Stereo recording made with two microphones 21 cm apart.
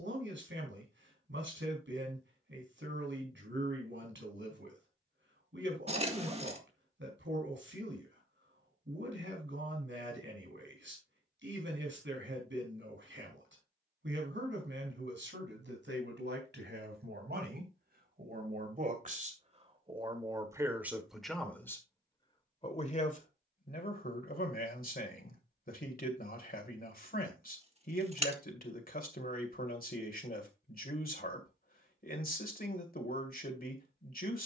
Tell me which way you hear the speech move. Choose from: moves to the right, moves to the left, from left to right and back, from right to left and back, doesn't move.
moves to the left.